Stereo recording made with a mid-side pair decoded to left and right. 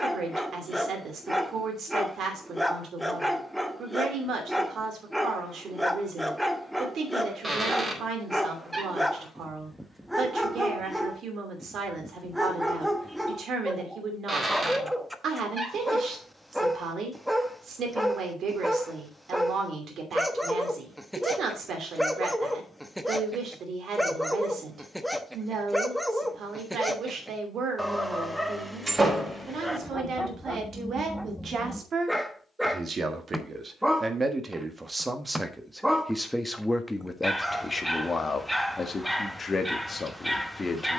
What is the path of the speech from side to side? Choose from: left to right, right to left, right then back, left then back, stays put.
right to left.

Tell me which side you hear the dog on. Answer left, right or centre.
centre.